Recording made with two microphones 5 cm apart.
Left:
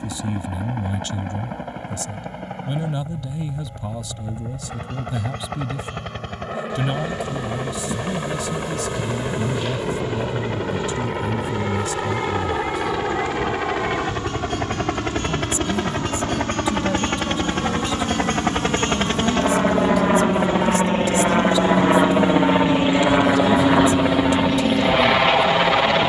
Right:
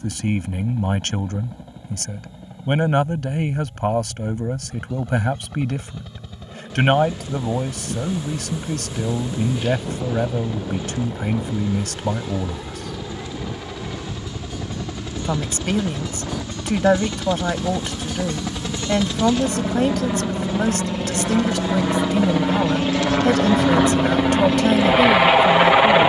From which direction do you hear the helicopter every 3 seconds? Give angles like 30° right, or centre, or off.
70° left, 70° left, 70° left, 60° left, 60° left, 60° left, 50° left, 20° left, 10° right.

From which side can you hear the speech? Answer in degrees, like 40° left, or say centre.
60° right.